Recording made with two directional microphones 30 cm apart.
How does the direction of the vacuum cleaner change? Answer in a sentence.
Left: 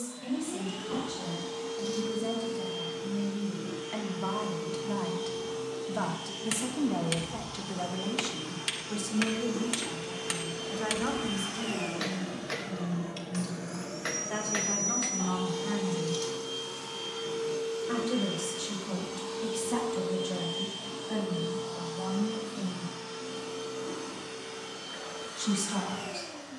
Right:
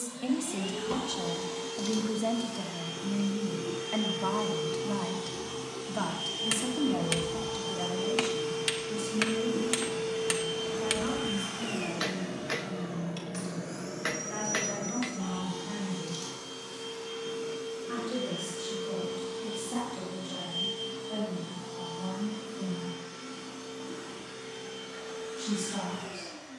In this clip you hear the vacuum cleaner travel towards the left.